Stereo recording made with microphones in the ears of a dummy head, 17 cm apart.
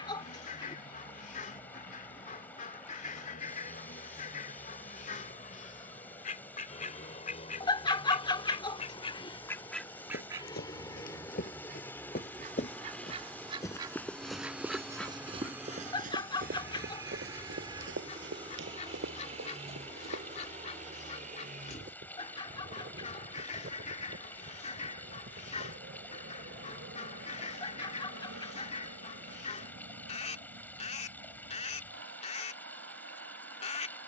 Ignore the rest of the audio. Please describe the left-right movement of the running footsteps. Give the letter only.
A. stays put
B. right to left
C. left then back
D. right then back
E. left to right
E.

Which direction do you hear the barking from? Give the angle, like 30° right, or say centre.
20° left.